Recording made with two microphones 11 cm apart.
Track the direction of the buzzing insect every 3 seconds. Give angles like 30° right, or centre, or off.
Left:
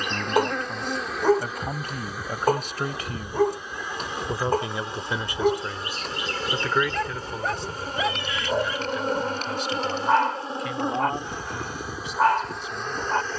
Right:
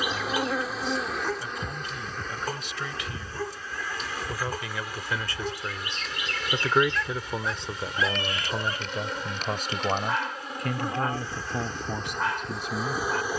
centre, 20° left, 40° left, 30° left, centre.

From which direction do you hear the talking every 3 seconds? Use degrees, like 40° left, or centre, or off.
50° left, 20° left, 20° right, 50° right, 60° right.